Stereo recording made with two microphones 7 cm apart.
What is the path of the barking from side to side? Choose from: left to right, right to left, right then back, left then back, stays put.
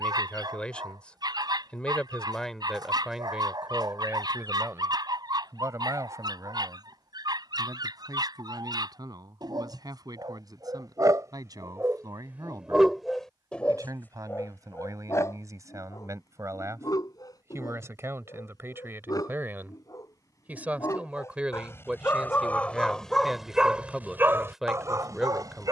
left then back.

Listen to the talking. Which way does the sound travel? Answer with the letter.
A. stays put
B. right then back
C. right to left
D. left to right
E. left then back
B.